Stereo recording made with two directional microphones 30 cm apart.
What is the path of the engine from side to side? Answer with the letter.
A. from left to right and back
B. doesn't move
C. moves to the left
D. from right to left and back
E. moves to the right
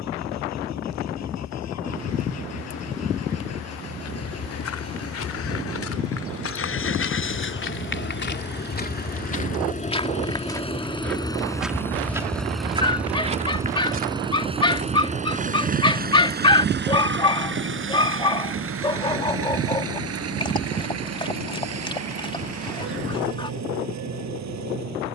E.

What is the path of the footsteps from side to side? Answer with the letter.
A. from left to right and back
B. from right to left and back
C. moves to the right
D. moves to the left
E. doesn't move
C.